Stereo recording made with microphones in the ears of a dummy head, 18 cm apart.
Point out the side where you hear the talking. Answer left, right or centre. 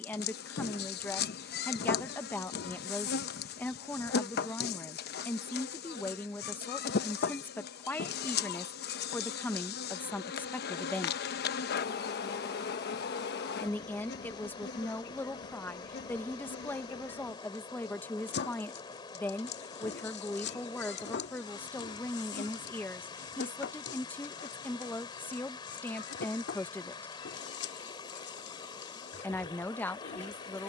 centre.